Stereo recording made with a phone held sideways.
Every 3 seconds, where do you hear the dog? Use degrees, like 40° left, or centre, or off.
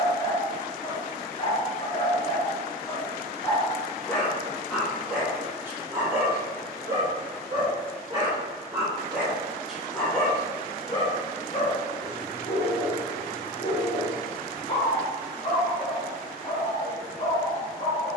30° left, centre, 20° right, 10° left, 30° left, 30° left.